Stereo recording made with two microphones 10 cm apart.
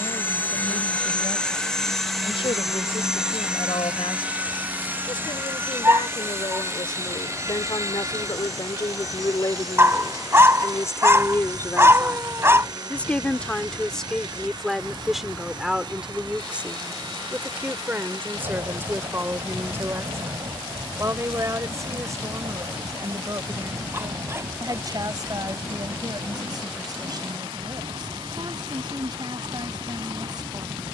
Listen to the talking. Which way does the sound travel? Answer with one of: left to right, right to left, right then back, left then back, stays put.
left to right.